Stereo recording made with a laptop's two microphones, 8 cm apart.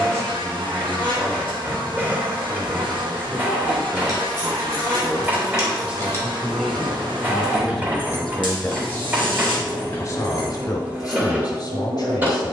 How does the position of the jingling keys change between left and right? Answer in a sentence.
In this clip you hear the jingling keys go right and come back.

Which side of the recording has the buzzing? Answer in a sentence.
In this clip you hear the buzzing on the right.